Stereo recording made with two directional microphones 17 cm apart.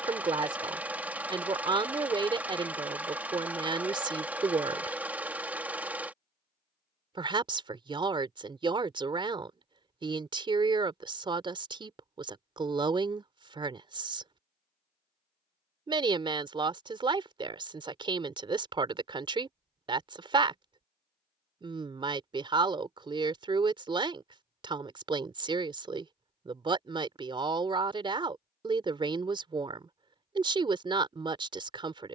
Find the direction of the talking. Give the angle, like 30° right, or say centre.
30° right.